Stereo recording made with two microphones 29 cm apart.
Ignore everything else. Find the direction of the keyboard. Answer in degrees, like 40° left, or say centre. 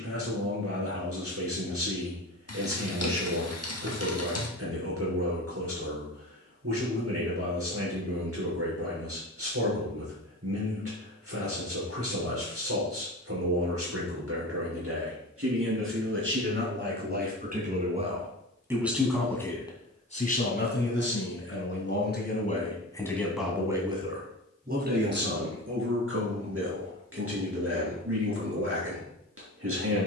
60° left.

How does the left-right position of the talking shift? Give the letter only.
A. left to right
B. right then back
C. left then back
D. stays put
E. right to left
C.